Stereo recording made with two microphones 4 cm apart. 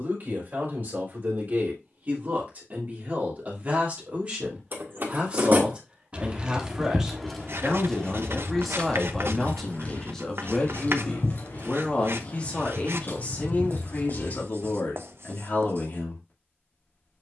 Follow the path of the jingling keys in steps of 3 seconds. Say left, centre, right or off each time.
off, right, centre, left, left, off.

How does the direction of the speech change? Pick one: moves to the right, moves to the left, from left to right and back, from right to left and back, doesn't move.
moves to the left.